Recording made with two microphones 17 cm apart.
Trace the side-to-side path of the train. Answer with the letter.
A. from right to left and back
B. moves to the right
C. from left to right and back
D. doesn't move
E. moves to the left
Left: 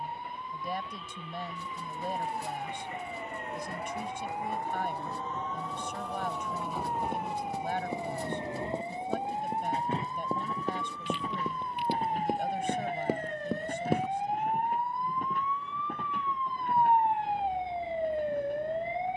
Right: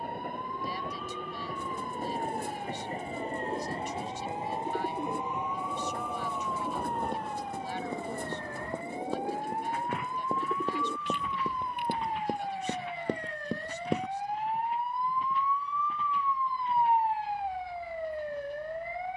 E.